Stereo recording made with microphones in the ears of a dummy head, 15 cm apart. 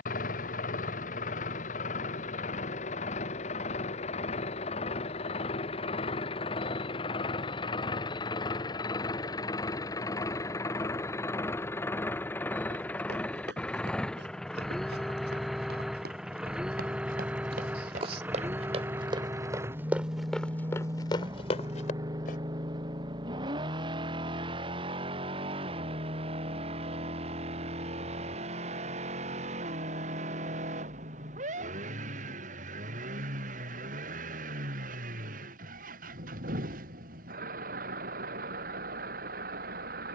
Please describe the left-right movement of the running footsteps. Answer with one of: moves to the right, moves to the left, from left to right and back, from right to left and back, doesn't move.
moves to the left.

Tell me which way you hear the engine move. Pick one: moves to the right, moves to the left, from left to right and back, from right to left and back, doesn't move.
moves to the right.